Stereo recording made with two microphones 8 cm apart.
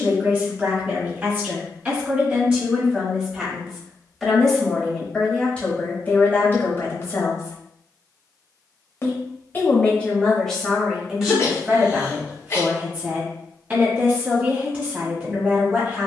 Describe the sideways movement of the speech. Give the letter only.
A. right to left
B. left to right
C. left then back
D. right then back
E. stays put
C.